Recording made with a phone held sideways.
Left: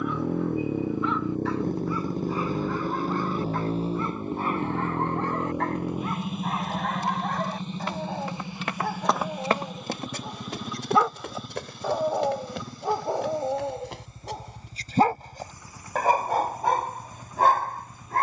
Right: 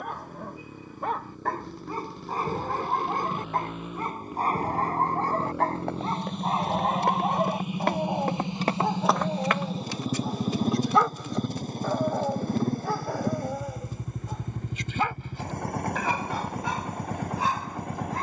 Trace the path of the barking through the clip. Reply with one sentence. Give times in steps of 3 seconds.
In this clip you hear the barking on the right from 0 s, in the centre from 9 s and on the left from 12 s.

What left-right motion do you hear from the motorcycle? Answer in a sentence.
You can hear the motorcycle move from left to right.